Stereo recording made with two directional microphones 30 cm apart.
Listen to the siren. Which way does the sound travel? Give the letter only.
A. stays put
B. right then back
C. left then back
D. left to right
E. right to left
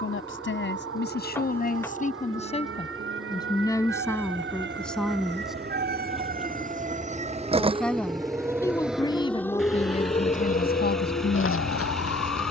E.